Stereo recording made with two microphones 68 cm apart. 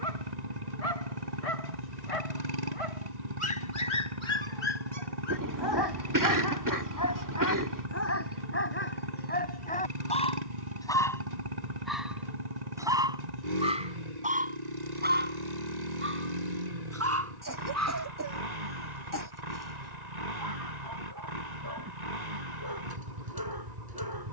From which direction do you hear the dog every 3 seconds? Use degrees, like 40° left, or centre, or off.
50° left, 40° left, 20° left, 10° left, 10° right, 20° right, 30° right, 30° right.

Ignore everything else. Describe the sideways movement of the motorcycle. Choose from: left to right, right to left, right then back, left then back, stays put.
stays put.